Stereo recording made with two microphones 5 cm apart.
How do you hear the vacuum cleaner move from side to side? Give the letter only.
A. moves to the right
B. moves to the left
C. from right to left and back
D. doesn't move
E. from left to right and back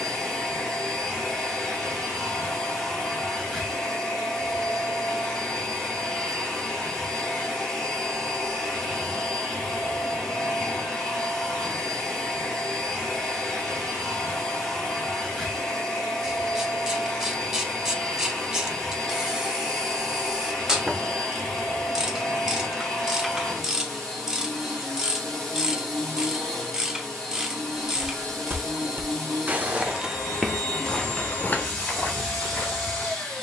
D.